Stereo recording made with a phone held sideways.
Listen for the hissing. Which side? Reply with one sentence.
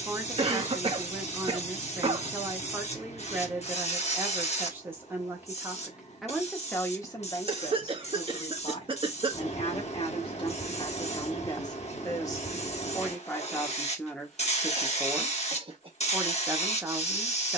In this clip you hear the hissing on the left.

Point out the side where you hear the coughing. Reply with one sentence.
You can hear the coughing on the right.